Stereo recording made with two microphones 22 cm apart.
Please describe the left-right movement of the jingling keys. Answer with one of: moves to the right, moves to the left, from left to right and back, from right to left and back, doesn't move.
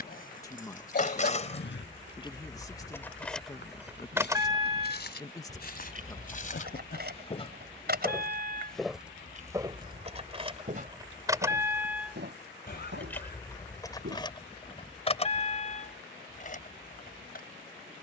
from left to right and back.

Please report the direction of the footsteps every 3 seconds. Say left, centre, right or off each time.
left, left, left, right, right, off.